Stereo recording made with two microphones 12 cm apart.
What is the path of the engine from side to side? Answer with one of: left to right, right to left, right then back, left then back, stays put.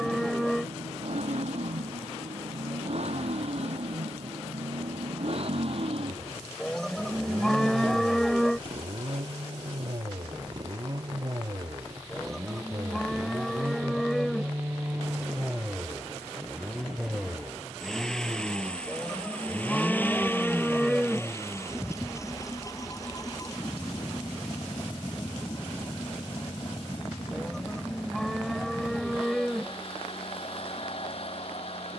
right to left.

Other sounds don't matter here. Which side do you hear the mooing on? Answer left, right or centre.
centre.